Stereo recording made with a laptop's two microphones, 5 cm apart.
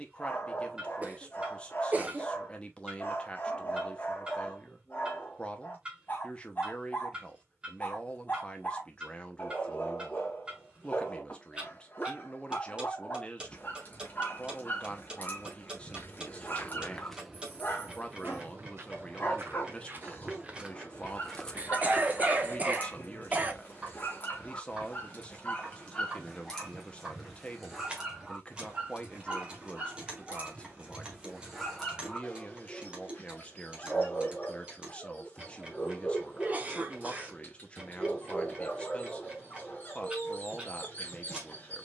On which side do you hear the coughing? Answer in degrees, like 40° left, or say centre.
30° right.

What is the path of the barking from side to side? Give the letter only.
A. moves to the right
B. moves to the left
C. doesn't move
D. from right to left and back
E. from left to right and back
E.